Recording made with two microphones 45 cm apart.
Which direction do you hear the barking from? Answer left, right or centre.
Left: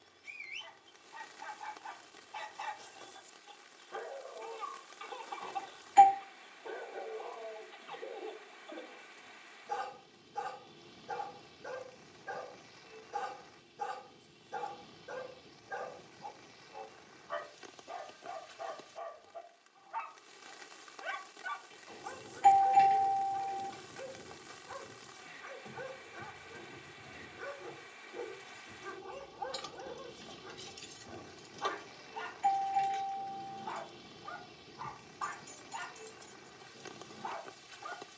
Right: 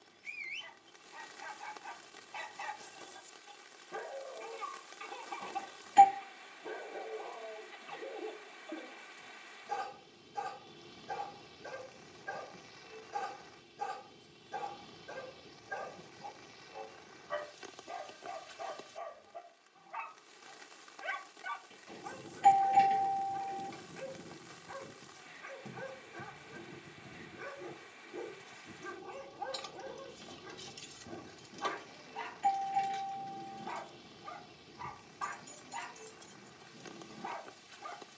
right.